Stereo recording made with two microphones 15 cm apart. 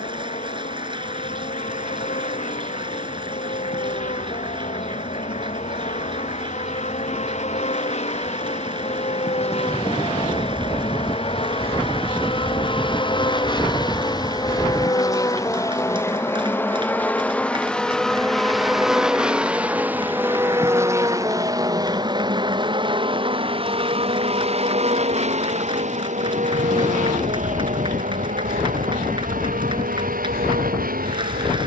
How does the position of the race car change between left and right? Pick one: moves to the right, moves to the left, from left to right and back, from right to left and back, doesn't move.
moves to the right.